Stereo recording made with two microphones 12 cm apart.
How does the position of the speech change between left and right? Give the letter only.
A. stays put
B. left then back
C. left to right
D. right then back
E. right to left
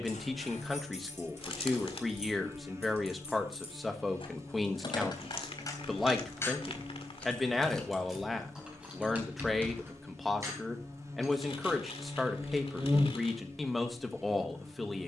A.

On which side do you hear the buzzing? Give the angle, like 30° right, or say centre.
20° right.